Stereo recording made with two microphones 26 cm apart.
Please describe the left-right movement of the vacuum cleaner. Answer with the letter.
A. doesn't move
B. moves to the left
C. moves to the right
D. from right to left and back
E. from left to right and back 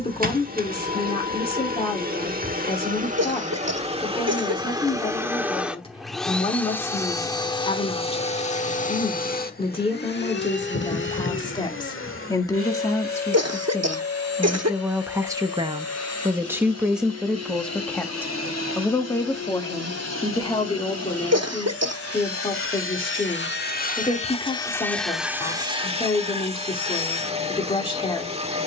D.